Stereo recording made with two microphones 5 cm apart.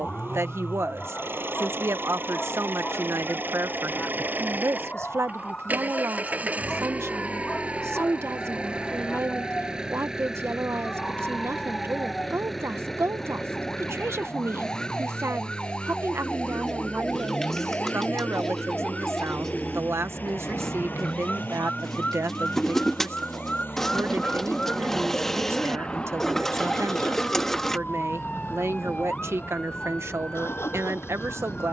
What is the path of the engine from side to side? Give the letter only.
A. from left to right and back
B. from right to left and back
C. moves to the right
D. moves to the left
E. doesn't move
D.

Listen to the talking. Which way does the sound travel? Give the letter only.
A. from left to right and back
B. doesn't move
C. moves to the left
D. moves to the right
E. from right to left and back
B.